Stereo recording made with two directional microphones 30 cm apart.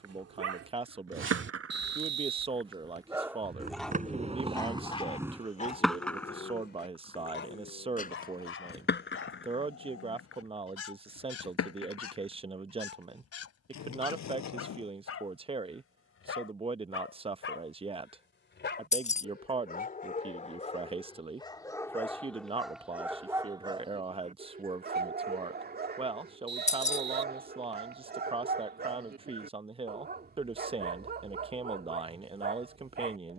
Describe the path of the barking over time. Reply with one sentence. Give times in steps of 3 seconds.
In this clip you hear the barking on the right from 0 s, in the centre from 3 s, on the left from 6 s, in the centre from 21 s and on the right from 24 s.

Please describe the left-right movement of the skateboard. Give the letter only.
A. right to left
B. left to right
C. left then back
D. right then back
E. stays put
A.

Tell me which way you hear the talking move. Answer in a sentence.
In this clip you hear the talking stay put.